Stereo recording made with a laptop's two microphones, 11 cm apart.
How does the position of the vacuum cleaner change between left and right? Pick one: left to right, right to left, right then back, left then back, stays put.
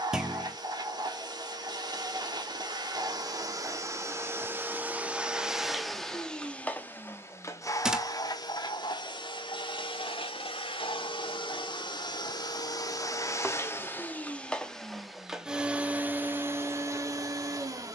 left then back.